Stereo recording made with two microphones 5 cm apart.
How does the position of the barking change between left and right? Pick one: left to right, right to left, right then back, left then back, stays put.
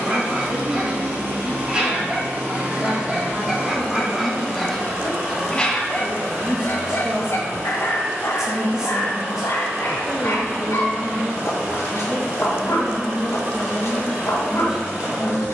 right to left.